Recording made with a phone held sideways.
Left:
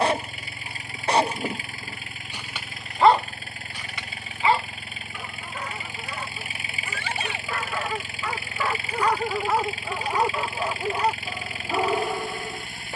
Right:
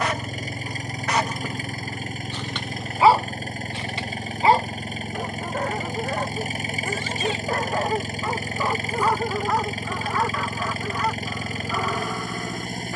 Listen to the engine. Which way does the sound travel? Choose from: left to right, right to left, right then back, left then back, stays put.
stays put.